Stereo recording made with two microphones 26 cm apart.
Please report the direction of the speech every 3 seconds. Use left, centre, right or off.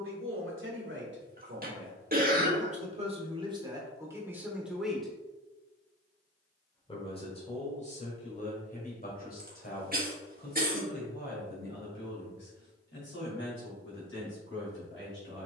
right, centre, left, left, left.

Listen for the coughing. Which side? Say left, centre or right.
right.